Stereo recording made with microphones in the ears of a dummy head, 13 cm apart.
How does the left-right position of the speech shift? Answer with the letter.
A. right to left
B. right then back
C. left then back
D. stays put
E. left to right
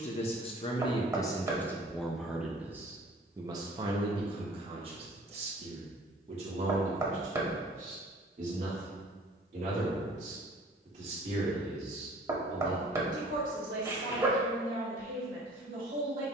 E.